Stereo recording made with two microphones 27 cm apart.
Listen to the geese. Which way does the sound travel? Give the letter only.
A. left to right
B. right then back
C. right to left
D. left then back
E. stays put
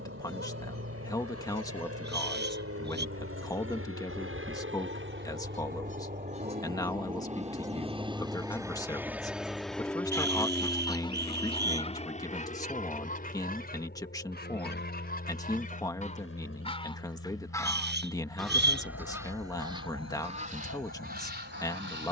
D.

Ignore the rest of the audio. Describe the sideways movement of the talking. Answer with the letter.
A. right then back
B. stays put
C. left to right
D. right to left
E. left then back
B.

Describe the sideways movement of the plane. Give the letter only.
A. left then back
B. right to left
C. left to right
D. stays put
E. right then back
B.